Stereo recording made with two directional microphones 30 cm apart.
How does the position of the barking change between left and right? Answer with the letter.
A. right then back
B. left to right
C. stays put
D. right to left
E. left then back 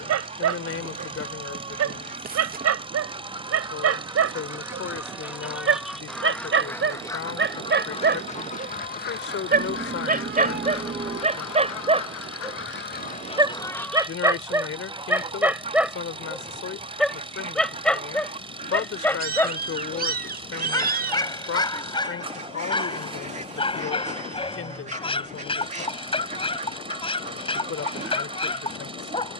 D.